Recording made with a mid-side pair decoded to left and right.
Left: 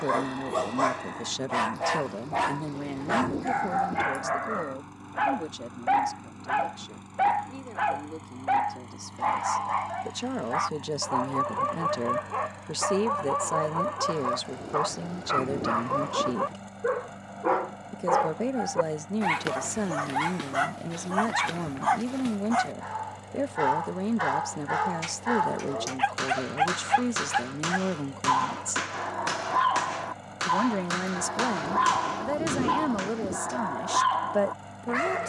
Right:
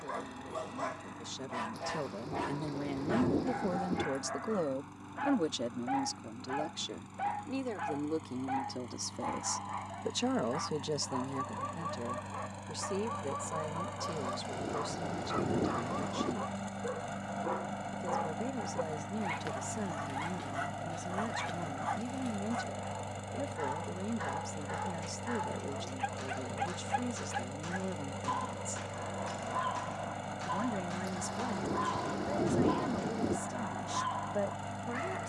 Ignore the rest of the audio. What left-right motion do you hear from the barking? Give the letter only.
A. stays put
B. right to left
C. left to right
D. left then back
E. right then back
A.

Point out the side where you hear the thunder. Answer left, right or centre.
centre.